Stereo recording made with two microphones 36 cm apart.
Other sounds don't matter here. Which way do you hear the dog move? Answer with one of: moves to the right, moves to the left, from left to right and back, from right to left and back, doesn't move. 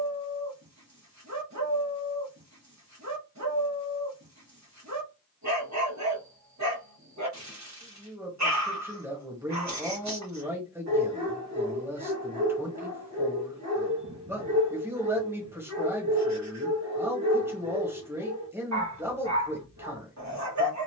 doesn't move.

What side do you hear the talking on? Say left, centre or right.
centre.